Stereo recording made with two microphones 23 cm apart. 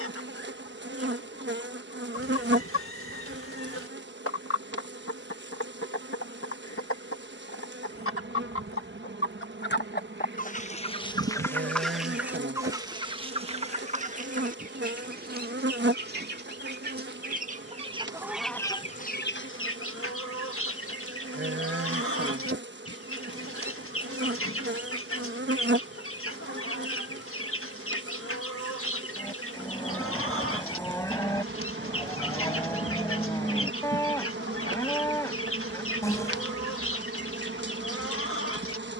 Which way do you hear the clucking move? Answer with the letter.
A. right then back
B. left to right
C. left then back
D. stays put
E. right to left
A.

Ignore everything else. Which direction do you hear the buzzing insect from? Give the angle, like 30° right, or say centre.
50° right.